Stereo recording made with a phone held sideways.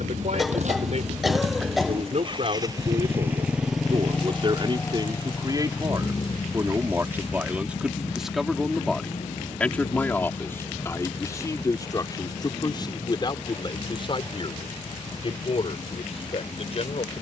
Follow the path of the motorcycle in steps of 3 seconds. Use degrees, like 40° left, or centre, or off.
50° right, 10° left, 40° left, 60° left, 60° left, 60° left.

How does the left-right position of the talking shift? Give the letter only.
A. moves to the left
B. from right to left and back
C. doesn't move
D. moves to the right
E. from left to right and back
A.